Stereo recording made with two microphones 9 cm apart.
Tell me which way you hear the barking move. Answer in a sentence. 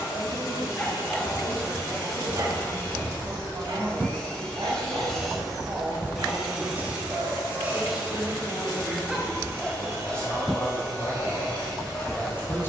In this clip you hear the barking go right and come back.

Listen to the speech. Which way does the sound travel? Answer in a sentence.
You can hear the speech go from the right side to the left.